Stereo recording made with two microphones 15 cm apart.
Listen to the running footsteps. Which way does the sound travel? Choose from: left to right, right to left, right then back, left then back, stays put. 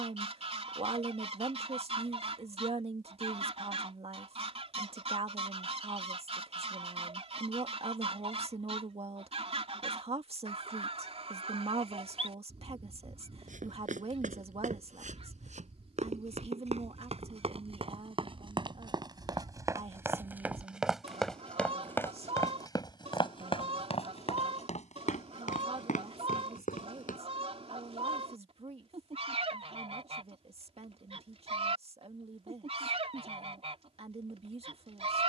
right to left.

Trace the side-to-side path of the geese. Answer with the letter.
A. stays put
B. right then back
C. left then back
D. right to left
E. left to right
A.